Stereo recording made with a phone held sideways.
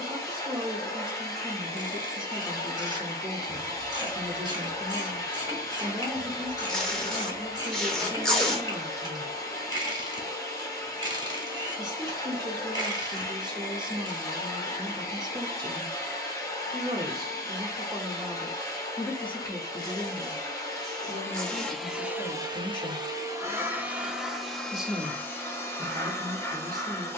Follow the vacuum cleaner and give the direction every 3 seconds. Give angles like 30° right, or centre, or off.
20° left, 20° left, 20° left, 20° left, 20° left, 20° left, 20° left, 10° right, 10° left.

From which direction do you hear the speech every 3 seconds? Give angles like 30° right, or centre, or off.
30° right, 30° right, 30° right, 30° right, 30° right, 30° right, 10° left, 30° left, 20° right.